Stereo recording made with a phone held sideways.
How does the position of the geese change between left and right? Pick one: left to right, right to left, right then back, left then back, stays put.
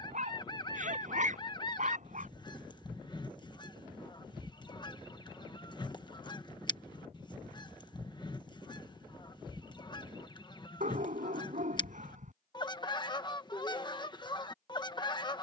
stays put.